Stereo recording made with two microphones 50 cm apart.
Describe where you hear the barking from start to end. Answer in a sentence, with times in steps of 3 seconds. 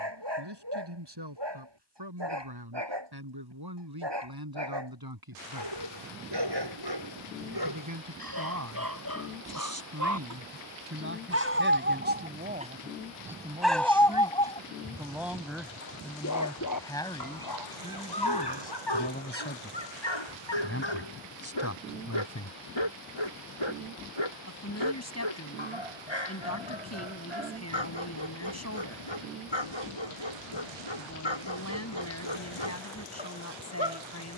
In this clip you hear the barking on the right from 0 s, in the centre from 12 s and on the left from 15 s.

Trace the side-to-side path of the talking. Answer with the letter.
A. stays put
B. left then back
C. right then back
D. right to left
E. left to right
D.